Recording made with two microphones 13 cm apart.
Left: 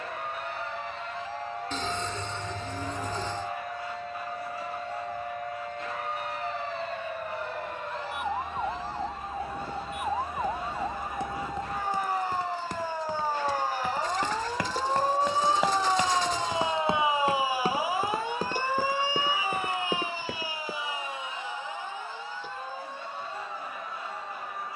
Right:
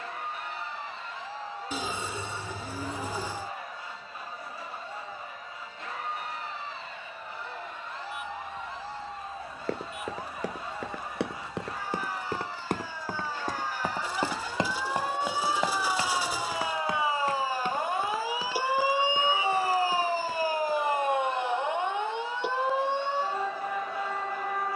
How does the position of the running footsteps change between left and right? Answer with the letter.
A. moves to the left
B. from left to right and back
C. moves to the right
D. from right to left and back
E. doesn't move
A.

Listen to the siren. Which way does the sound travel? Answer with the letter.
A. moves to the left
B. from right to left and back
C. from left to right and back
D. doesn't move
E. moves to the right
E.